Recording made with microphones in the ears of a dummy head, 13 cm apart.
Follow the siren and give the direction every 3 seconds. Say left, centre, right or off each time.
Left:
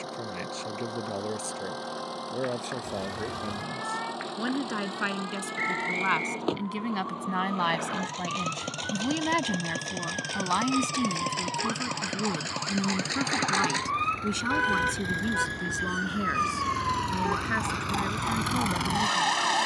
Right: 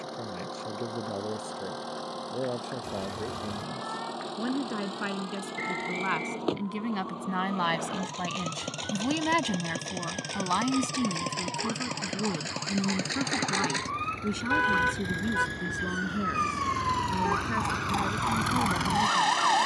left, left, left, left, left, centre, right.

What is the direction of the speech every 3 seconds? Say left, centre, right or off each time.
left, left, centre, centre, left, left, left.